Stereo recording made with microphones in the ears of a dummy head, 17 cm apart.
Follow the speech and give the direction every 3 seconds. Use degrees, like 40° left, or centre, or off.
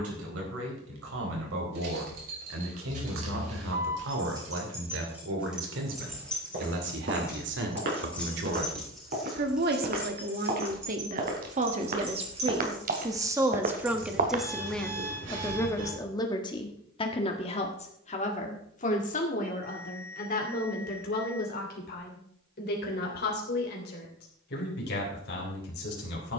80° right, 80° right, 70° right, 50° right, 10° right, 20° left, 40° left, 60° left, 60° left.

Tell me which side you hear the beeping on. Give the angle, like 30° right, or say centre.
70° right.